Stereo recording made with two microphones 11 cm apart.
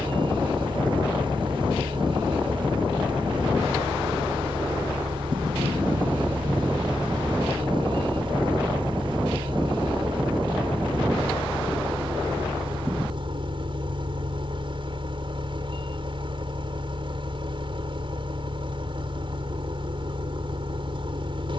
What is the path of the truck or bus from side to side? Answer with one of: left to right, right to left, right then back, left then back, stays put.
stays put.